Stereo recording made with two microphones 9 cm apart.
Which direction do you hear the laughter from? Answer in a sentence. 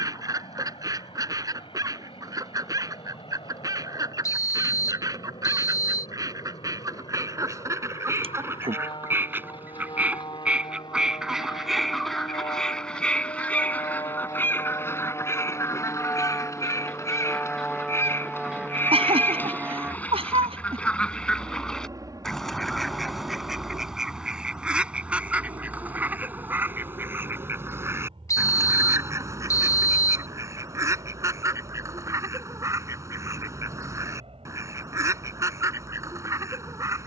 In this clip you hear the laughter on the right.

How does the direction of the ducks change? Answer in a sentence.
In this clip you hear the ducks go left and come back.